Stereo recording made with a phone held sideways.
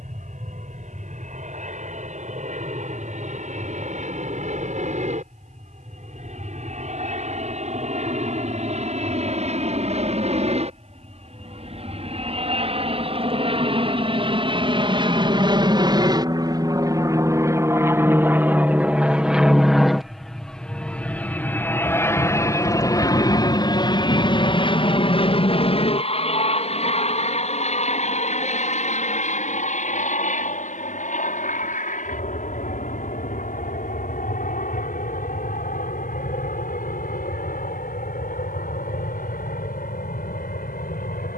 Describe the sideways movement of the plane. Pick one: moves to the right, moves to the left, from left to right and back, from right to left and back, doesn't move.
moves to the left.